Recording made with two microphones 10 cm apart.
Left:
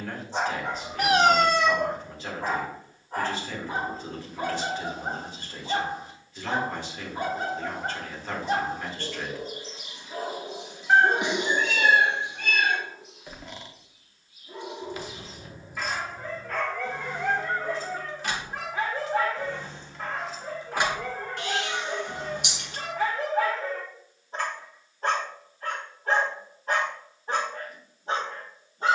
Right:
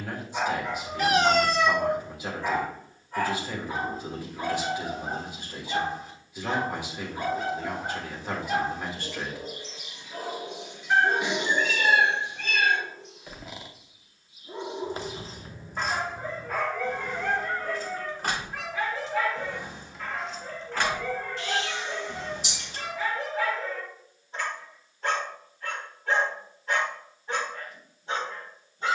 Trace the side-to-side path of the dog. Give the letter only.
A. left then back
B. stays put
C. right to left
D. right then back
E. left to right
D.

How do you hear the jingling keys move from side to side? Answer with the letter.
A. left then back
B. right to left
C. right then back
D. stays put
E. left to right
C.